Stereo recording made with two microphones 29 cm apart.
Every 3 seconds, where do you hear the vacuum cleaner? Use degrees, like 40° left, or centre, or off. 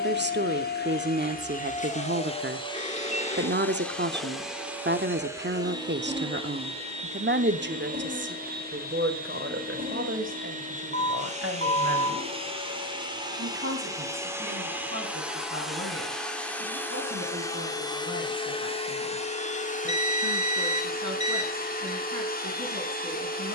30° left, centre, 30° right, 30° right, 10° right, centre, 20° left, 30° left.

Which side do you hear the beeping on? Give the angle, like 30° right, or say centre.
20° left.